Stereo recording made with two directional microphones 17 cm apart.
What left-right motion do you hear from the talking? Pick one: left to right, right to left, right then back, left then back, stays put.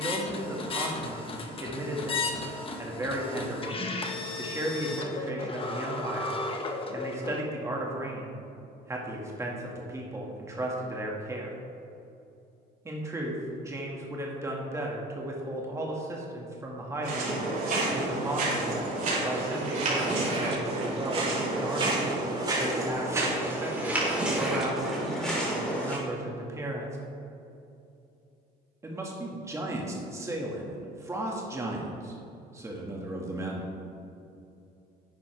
stays put.